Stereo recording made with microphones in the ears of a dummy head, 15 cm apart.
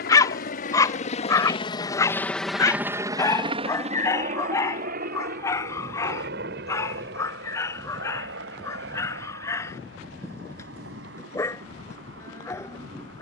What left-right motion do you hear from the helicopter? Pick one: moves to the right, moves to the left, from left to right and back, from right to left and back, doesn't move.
moves to the right.